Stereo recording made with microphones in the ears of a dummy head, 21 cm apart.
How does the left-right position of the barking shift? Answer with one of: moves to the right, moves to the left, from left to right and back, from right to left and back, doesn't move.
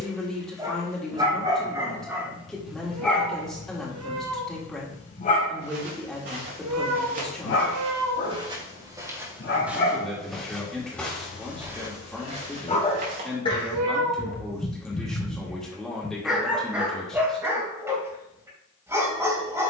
from right to left and back.